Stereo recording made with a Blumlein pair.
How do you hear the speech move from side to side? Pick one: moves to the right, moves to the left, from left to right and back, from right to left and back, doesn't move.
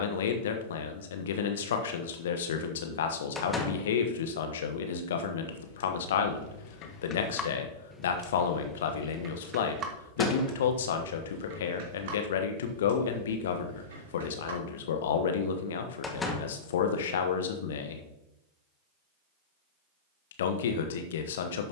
doesn't move.